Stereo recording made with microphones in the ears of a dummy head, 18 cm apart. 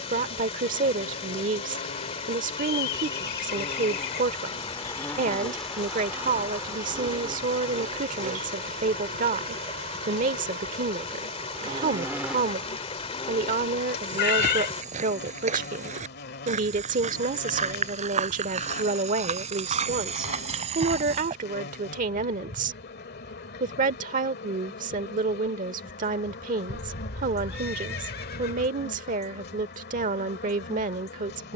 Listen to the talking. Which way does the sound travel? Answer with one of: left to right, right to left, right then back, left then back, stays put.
stays put.